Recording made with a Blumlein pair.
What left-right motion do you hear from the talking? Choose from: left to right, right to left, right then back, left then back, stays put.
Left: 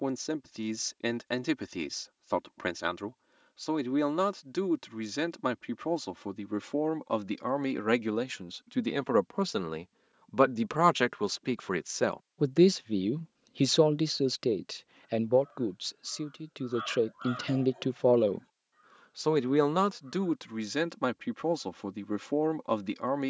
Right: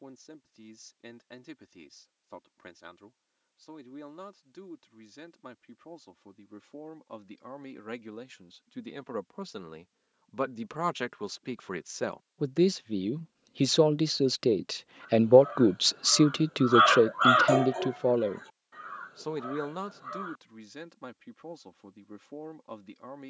right then back.